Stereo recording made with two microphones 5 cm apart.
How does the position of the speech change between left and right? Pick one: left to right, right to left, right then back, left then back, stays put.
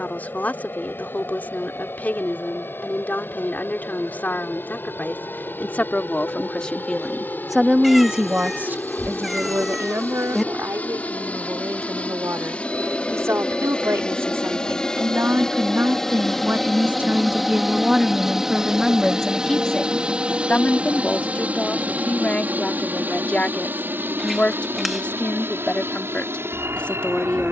right then back.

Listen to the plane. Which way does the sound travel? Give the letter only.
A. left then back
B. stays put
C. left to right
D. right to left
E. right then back
C.